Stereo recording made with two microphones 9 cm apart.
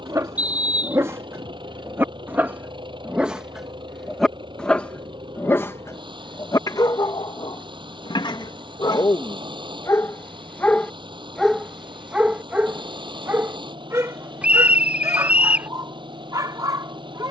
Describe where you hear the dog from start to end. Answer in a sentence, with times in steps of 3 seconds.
In this clip you hear the dog on the right from 0 s, in the centre from 3 s, on the left from 6 s and on the right from 12 s.